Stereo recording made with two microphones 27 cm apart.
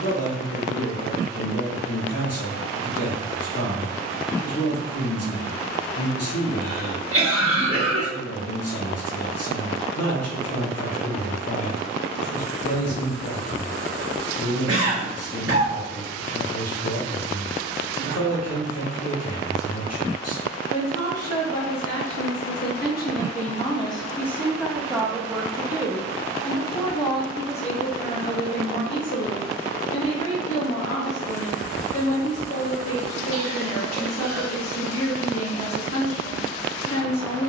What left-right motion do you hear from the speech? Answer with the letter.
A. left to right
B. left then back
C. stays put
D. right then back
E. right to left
D.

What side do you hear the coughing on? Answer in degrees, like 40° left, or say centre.
50° right.